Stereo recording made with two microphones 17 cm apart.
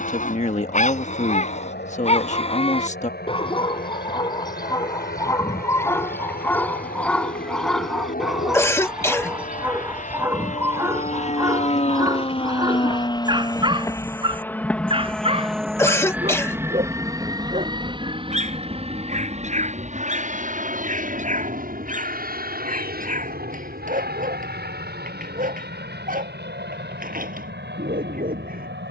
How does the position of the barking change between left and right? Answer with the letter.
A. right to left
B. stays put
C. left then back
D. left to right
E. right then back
D.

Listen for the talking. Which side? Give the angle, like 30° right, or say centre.
40° left.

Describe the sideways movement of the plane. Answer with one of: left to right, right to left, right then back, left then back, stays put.
left to right.